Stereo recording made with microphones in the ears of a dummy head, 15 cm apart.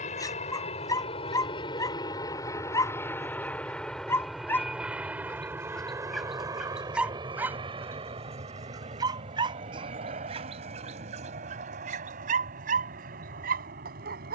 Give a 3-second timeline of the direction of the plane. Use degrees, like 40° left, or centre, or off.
30° left, centre, 20° right, 40° right, 50° right.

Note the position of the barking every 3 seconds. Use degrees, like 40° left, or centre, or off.
20° left, 10° left, 10° right, 30° right, 50° right.